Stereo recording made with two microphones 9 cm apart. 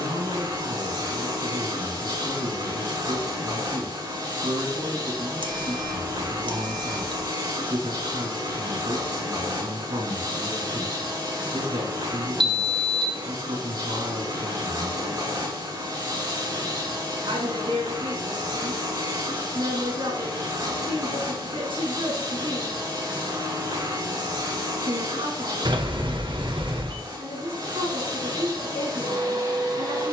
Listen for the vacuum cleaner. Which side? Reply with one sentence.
In this clip you hear the vacuum cleaner on the right.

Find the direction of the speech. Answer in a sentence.
You can hear the speech on the right.